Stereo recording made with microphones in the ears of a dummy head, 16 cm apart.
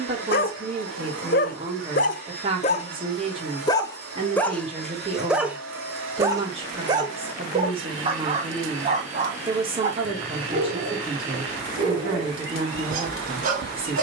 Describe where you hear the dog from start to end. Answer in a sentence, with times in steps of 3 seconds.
You can hear the dog on the left from 0 s, in the centre from 3 s and on the right from 6 s.